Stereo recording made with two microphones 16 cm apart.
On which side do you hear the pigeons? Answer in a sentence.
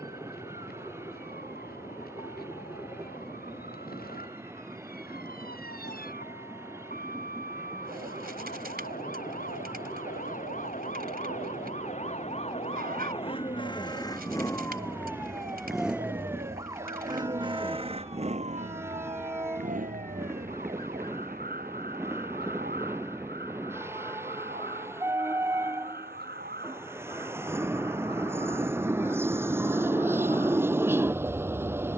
You can hear the pigeons on the right.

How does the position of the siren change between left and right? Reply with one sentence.
In this clip you hear the siren go from the left side to the right.